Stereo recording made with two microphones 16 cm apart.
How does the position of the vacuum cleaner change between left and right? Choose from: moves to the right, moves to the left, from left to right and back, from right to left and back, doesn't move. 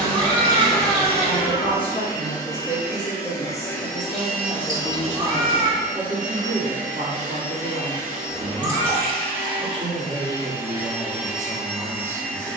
from left to right and back.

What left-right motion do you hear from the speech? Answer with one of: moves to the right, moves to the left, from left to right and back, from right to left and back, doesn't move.
moves to the right.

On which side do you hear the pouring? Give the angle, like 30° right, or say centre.
30° left.